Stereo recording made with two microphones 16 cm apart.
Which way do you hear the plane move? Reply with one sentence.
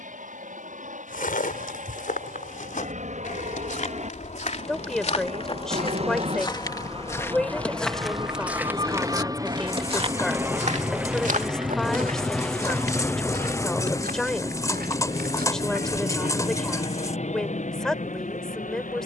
You can hear the plane travel towards the left.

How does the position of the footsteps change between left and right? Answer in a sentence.
You can hear the footsteps move to the right.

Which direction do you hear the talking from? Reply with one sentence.
In this clip you hear the talking in the centre.